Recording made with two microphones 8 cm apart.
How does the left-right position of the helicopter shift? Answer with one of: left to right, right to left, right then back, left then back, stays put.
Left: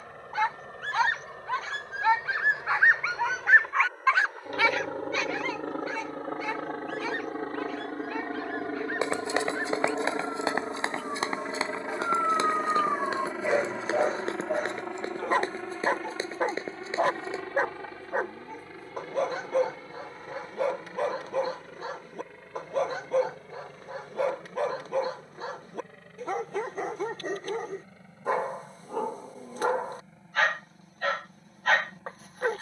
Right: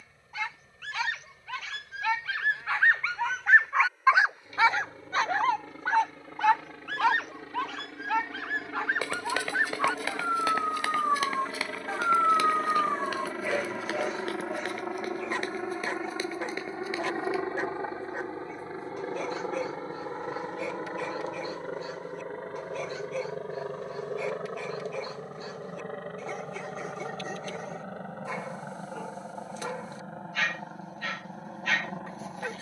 left to right.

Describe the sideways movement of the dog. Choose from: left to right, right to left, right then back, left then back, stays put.
right then back.